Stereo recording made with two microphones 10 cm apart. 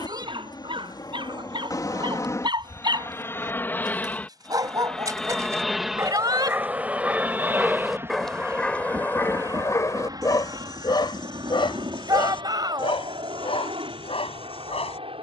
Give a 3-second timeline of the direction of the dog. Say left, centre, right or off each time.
right, right, centre, left, left.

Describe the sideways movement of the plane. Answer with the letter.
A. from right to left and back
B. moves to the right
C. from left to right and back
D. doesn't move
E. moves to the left
B.